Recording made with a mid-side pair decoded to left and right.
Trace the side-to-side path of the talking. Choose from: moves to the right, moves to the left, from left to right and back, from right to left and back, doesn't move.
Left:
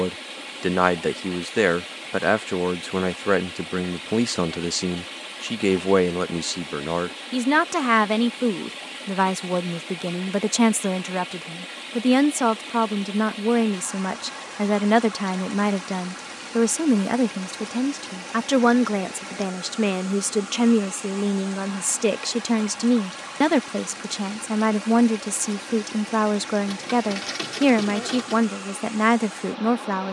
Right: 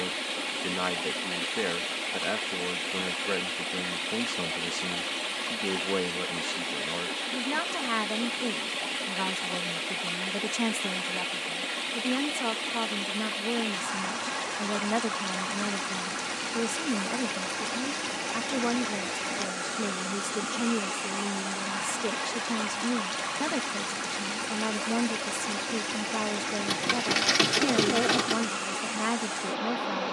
doesn't move.